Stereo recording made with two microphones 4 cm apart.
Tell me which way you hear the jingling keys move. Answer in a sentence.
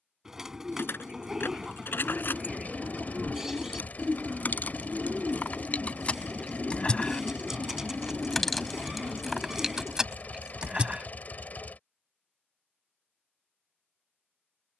In this clip you hear the jingling keys move to the right.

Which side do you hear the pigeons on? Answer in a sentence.
In this clip you hear the pigeons in the centre.